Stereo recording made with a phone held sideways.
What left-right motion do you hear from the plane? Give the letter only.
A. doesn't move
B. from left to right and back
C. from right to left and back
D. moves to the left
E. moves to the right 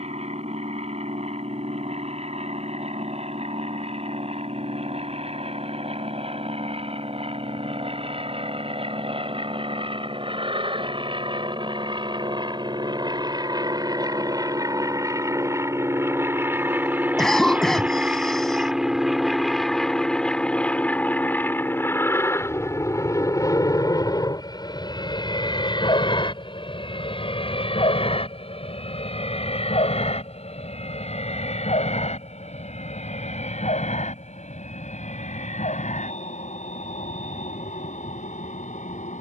D.